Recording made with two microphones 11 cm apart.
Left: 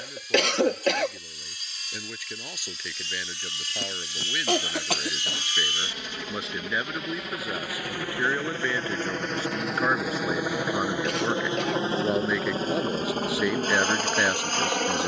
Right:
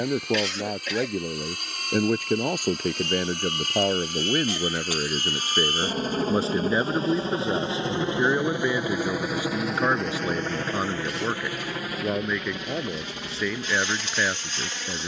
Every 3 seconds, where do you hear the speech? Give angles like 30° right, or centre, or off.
50° right, 40° right, 30° right, 10° right, 10° left.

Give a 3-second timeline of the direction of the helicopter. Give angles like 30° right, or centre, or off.
60° right, 50° right, 30° right, 10° left, 40° left.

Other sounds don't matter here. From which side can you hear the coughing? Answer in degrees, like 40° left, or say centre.
70° left.